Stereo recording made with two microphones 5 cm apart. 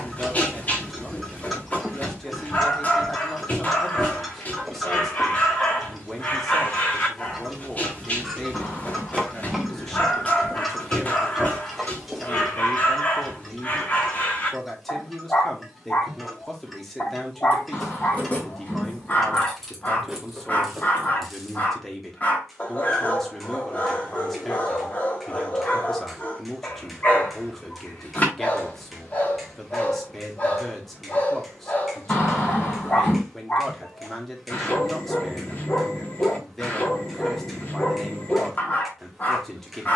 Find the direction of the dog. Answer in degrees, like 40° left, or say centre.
30° left.